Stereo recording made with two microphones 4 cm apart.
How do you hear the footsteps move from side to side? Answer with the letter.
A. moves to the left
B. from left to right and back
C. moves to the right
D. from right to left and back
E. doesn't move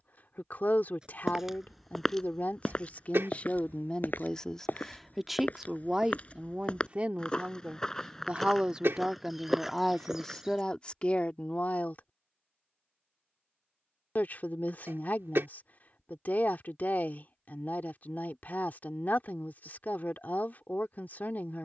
D.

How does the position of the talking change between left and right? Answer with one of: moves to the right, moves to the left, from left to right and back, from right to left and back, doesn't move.
from left to right and back.